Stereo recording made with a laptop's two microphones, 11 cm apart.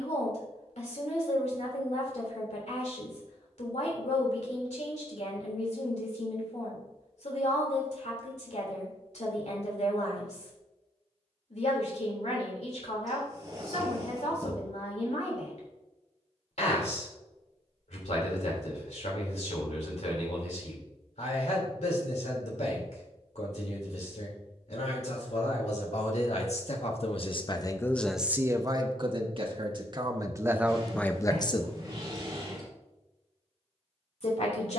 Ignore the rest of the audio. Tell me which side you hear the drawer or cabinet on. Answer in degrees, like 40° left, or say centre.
30° right.